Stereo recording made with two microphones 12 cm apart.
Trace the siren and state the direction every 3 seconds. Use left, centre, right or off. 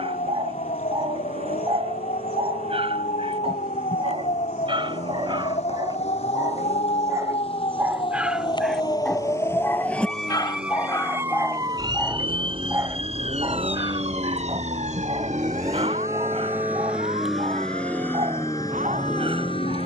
left, left, left, centre, right, right, right.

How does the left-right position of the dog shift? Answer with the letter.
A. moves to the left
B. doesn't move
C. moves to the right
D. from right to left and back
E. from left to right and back
D.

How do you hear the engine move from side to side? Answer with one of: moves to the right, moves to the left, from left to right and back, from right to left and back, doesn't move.
moves to the left.